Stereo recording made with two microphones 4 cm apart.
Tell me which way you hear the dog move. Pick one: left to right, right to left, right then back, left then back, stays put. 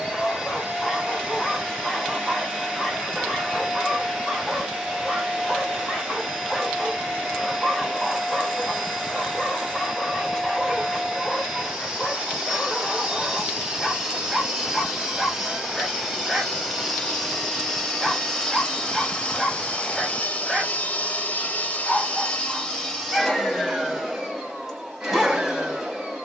stays put.